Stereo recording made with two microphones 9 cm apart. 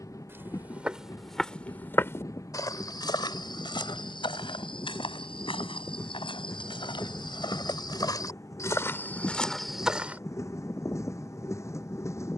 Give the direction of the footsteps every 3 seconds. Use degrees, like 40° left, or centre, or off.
10° left, 60° left, 50° left, centre.